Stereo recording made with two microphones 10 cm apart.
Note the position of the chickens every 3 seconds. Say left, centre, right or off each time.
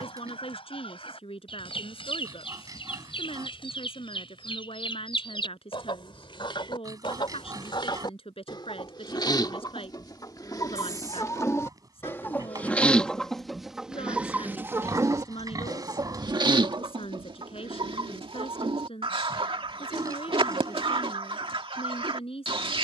left, left, left, left, centre, right, right, right.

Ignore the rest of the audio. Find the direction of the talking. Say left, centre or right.
left.